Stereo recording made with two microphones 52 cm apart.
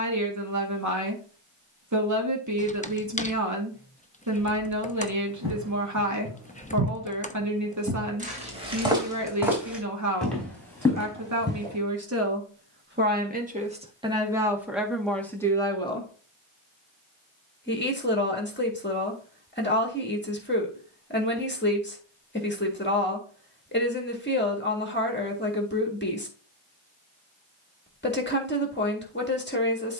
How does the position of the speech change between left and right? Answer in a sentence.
In this clip you hear the speech move from right to left.